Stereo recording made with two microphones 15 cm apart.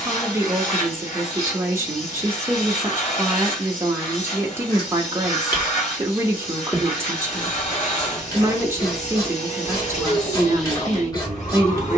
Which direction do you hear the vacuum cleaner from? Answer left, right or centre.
left.